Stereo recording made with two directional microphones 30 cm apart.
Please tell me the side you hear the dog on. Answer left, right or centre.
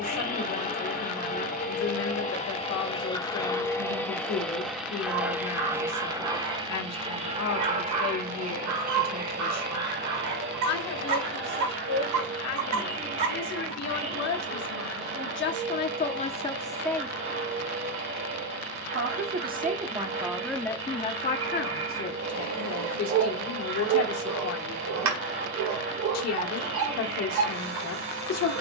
right.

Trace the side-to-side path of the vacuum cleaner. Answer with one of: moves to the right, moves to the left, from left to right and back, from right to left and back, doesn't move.
moves to the right.